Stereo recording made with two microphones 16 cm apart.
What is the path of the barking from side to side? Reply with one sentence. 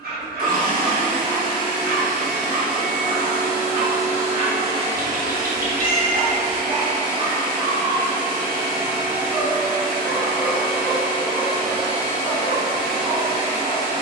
In this clip you hear the barking travel towards the left.